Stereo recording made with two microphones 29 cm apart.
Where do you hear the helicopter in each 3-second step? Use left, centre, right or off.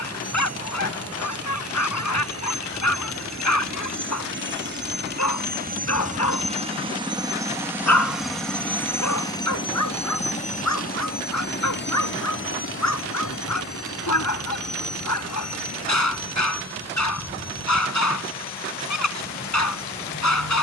right, right, centre, left, left, left, left.